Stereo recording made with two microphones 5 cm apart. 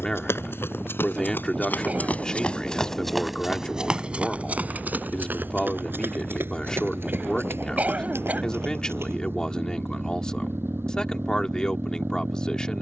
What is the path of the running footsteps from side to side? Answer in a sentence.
You can hear the running footsteps go from the left side to the right.